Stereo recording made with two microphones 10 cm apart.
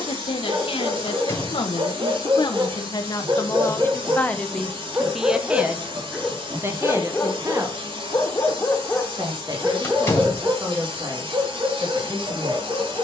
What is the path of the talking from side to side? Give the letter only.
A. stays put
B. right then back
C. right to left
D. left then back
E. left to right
E.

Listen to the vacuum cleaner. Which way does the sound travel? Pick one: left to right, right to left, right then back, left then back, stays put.
stays put.